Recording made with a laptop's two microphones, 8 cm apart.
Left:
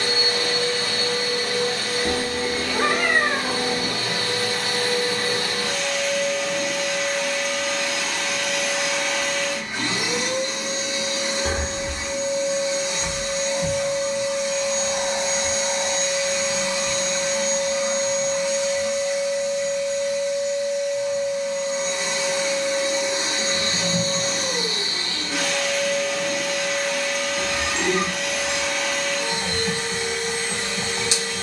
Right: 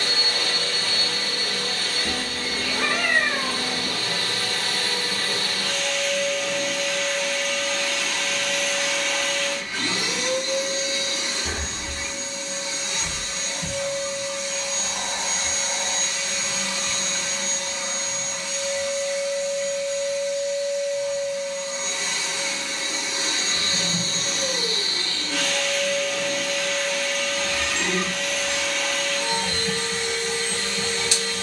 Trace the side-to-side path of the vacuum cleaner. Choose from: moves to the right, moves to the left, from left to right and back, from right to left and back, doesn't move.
doesn't move.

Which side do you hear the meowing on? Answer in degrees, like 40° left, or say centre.
40° left.